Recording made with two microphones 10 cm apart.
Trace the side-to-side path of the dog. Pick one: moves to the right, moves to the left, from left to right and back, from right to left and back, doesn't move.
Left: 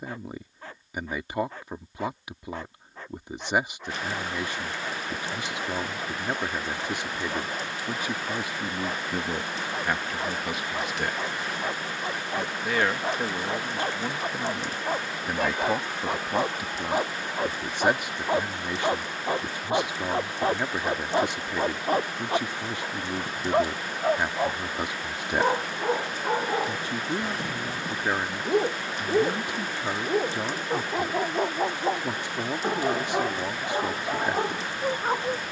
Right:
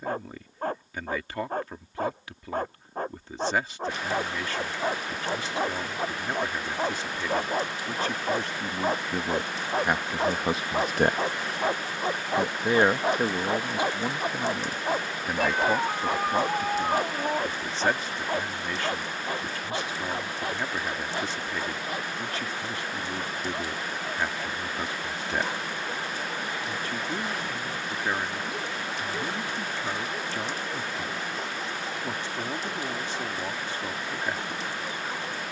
moves to the left.